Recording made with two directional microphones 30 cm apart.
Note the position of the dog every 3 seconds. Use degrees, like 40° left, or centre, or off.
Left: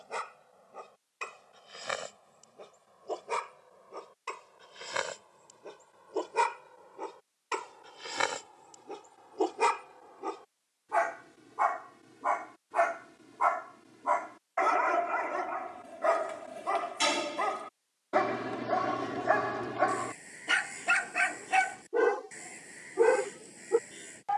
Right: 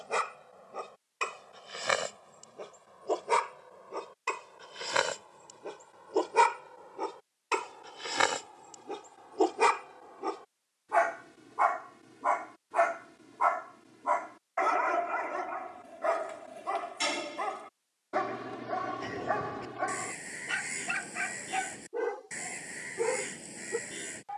50° right, 50° right, 40° right, 20° right, 10° right, 10° left, 30° left, 40° left.